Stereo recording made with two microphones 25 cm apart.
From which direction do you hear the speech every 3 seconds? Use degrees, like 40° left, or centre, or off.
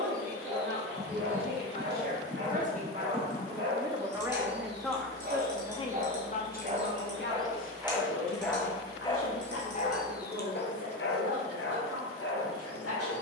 40° right, centre, 50° left, 70° left, 80° left.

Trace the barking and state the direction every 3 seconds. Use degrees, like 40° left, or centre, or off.
60° right, 40° right, 10° right, 40° left, 70° left.